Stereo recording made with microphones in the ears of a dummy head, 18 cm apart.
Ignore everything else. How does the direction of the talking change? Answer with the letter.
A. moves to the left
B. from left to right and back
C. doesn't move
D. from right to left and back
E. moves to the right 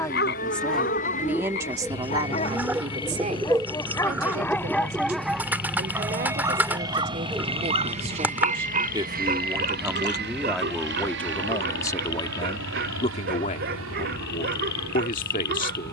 B.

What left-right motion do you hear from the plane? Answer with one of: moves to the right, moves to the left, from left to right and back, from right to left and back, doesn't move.
moves to the right.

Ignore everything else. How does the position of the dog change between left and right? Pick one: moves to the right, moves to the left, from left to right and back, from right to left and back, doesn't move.
moves to the right.